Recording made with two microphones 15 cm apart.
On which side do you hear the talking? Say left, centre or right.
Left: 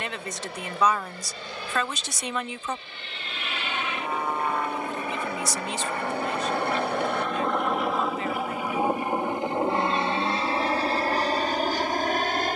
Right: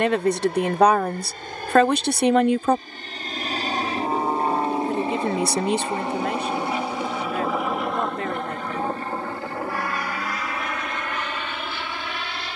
right.